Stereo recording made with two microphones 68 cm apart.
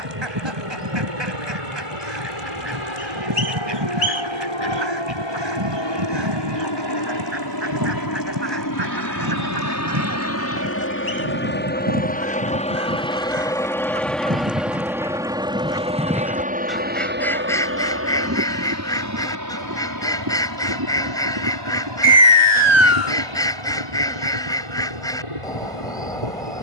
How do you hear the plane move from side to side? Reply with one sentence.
You can hear the plane travel towards the right.